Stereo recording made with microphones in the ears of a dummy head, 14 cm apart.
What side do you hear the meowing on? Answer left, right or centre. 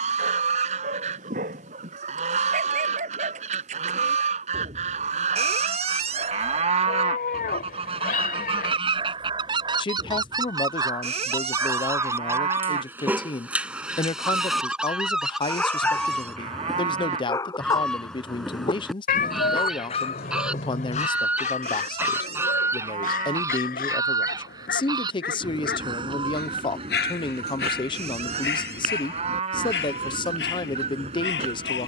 left.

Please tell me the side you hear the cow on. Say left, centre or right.
right.